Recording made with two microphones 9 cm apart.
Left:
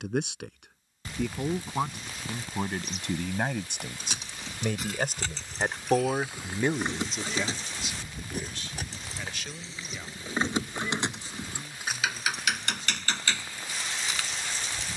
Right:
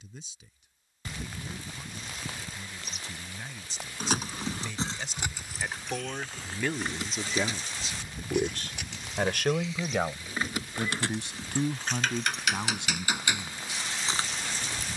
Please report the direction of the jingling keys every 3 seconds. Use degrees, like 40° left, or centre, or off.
off, 30° right, 30° left, 20° left, 20° right.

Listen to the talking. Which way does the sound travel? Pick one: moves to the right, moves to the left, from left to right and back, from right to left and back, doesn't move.
moves to the right.